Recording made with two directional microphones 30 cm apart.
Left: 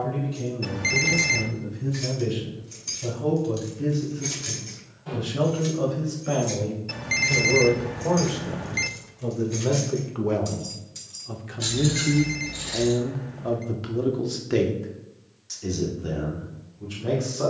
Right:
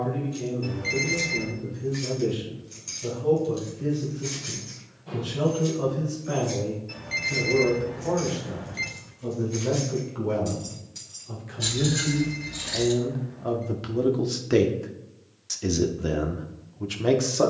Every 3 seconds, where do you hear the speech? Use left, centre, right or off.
left, left, left, left, centre, right.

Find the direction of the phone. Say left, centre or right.
left.